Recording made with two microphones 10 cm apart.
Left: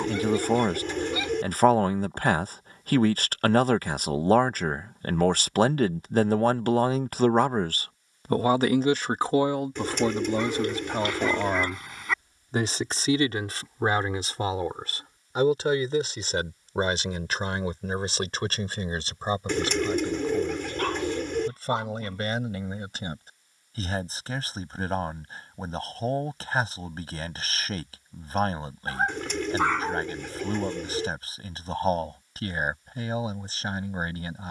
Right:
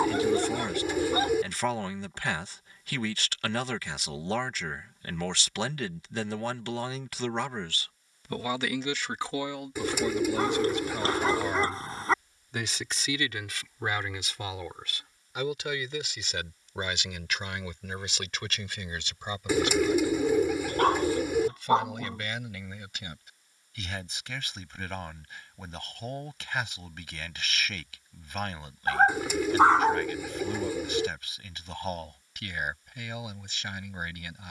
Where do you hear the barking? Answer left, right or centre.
right.